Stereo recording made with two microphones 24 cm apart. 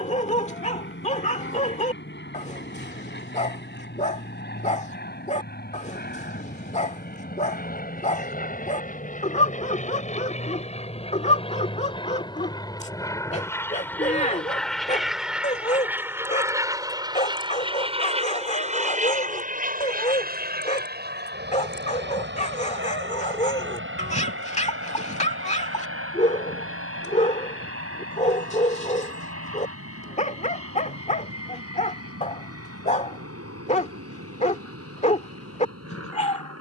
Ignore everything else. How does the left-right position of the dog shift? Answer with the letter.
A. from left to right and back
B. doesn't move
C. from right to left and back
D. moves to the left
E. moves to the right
B.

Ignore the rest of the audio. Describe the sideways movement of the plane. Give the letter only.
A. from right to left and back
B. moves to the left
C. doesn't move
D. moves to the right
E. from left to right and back
D.